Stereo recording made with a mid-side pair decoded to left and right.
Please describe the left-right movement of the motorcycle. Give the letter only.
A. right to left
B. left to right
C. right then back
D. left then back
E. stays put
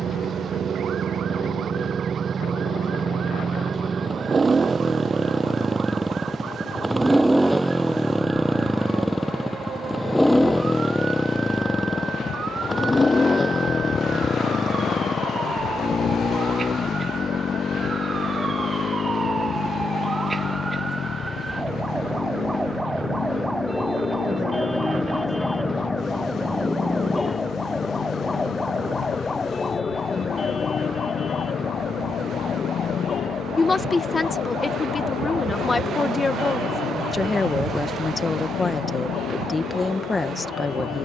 A.